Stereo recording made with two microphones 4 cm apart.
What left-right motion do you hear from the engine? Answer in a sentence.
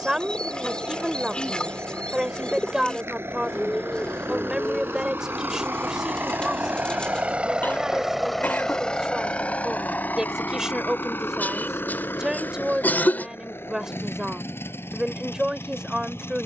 In this clip you hear the engine move to the left.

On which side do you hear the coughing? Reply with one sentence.
In this clip you hear the coughing on the left.